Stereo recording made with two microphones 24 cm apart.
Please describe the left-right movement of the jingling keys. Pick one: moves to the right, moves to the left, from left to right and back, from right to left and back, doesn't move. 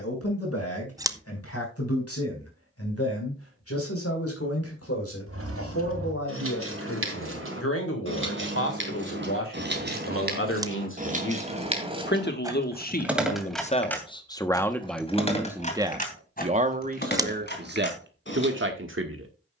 moves to the left.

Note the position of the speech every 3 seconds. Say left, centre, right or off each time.
left, left, left, left, left, right, right.